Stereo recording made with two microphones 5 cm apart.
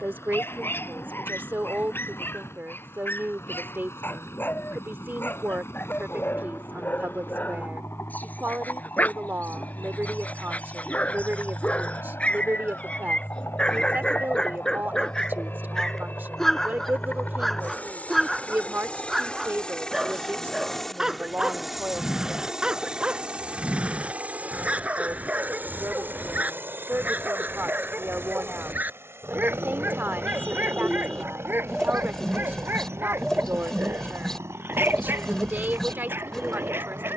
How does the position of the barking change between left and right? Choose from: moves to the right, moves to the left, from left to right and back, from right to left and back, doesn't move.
moves to the right.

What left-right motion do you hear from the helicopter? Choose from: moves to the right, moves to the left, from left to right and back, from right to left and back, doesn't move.
moves to the right.